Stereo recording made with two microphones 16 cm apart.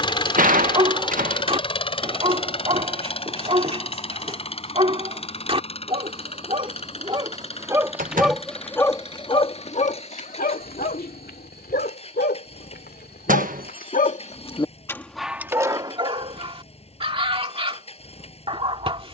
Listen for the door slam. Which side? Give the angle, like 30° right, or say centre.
60° right.